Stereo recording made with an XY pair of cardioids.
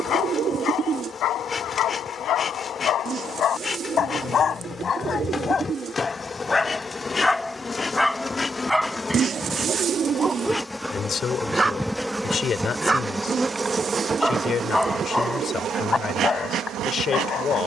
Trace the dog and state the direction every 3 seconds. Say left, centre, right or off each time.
left, left, centre, centre, centre, left.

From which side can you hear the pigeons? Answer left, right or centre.
right.